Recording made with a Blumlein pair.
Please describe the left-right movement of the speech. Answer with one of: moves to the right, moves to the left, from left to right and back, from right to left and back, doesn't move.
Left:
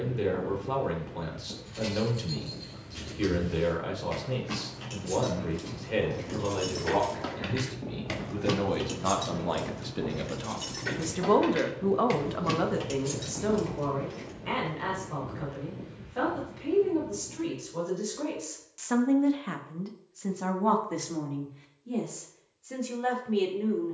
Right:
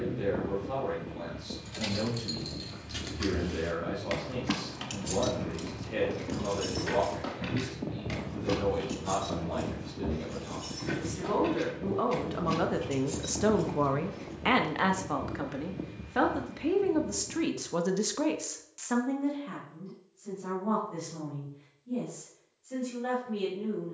from left to right and back.